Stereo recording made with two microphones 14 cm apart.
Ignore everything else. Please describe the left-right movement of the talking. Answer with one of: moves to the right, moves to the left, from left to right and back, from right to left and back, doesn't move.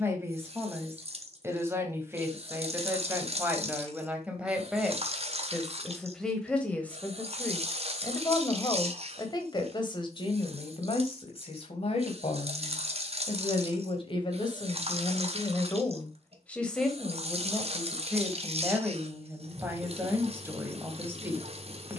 from right to left and back.